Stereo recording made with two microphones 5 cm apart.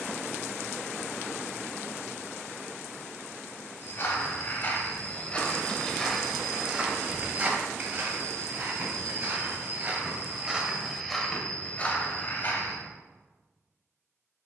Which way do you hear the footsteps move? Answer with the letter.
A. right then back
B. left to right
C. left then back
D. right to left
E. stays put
A.